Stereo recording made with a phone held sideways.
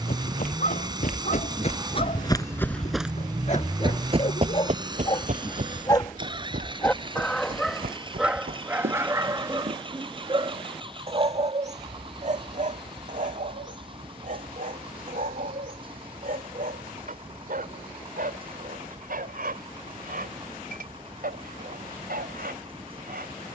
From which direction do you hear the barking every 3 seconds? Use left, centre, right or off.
left, left, centre, right, right, right, right, right.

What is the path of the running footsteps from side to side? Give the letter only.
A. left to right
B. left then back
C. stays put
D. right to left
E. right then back
A.